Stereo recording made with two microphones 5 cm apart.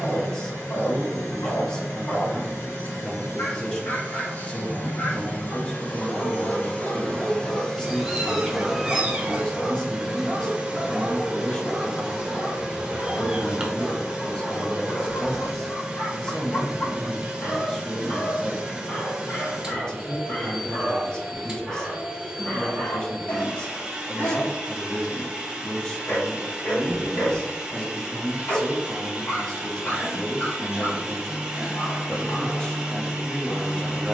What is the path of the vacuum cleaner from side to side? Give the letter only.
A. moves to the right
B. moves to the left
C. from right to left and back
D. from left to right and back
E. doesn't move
A.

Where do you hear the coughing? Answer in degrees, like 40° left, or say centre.
30° right.